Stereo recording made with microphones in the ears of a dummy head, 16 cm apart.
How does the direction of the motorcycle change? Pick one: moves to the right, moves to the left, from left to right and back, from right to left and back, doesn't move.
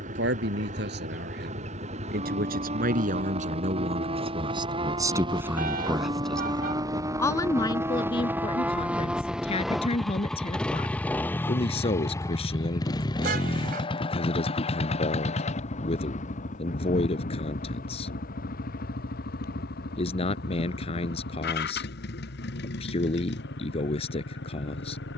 moves to the left.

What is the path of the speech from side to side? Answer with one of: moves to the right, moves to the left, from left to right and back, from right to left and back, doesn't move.
moves to the left.